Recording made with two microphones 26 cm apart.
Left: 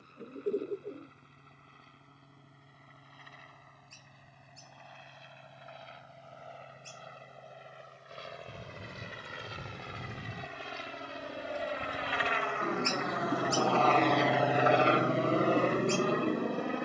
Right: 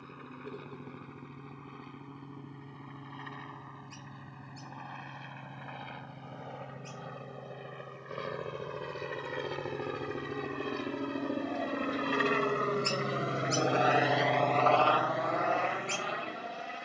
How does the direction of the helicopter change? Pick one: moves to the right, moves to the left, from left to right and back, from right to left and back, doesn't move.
moves to the left.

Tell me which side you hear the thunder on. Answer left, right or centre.
left.